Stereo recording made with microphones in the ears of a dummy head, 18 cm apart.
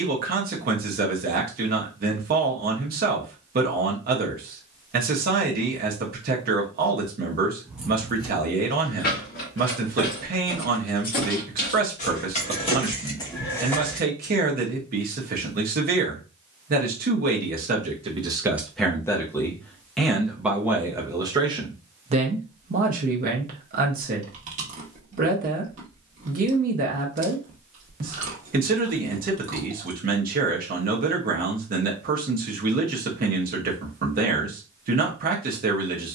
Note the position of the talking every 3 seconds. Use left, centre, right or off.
right, right, right, right, right, right, centre, right, right, right, right, right.